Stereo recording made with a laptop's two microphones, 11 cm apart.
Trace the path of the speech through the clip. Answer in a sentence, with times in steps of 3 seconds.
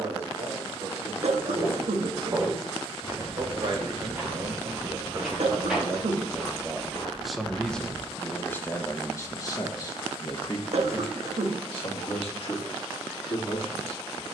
In this clip you hear the speech on the right from 0 s, in the centre from 6 s and on the left from 9 s.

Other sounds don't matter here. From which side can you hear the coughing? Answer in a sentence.
In this clip you hear the coughing on the right.